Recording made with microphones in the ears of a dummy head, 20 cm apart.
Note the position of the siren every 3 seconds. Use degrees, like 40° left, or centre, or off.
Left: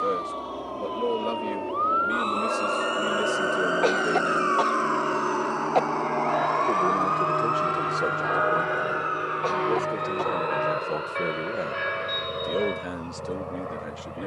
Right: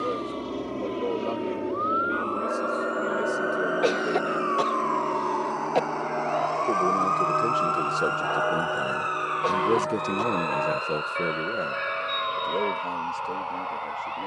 50° left, 20° left, 30° right, 60° right, 70° right.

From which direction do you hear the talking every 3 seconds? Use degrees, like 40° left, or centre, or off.
20° left, 10° left, 10° right, 20° right, 20° left.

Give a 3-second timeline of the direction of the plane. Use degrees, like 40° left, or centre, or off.
30° right, centre, 20° left, 40° left, 50° left.